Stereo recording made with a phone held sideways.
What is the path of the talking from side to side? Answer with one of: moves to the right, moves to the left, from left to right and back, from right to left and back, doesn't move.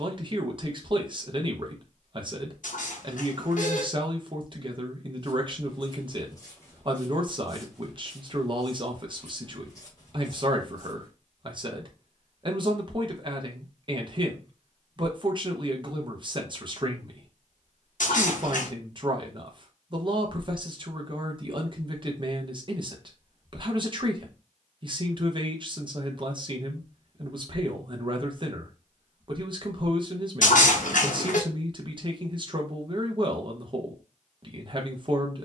doesn't move.